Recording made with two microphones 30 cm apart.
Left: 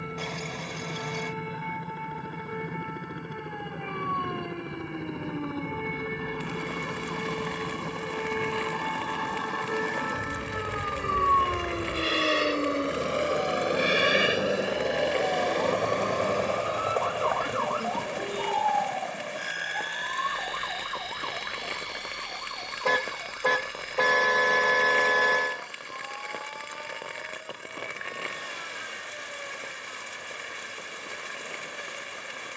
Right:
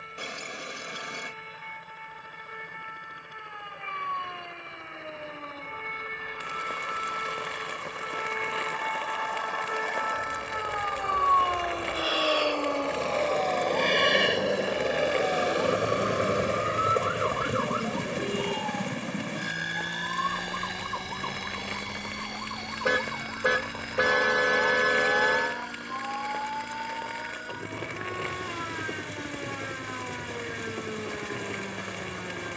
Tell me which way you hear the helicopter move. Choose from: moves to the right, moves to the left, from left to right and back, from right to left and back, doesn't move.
moves to the right.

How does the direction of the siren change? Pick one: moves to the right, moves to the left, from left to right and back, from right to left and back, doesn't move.
moves to the right.